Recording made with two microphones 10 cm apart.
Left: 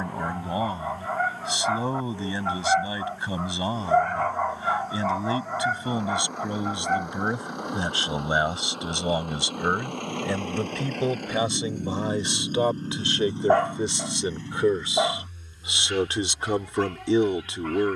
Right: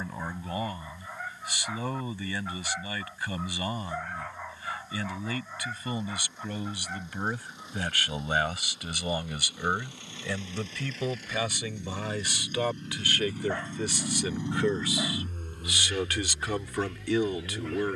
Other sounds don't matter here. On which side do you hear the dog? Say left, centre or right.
left.